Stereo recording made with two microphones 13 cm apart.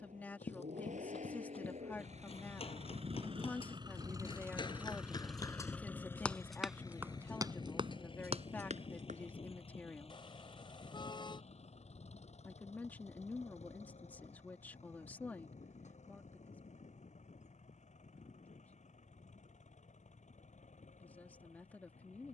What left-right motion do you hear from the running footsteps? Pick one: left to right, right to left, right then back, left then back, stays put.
left to right.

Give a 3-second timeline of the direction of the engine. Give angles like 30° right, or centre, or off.
70° right, 20° right, 30° left, 50° left, 60° left, 60° left, 70° left, 70° left.